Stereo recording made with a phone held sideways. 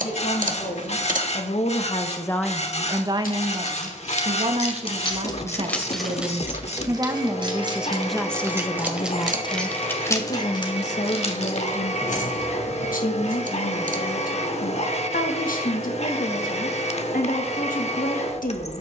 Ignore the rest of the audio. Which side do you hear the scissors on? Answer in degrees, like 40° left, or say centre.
60° right.